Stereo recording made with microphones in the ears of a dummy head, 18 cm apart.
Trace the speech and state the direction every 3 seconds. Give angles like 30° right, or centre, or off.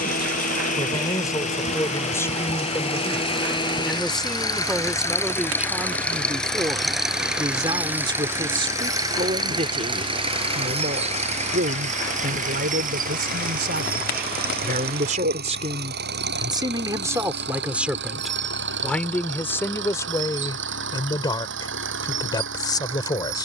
10° left, centre, 20° right, 40° right, 50° right, 20° right, 10° left, 20° left.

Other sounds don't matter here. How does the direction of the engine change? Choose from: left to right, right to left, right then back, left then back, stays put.
left to right.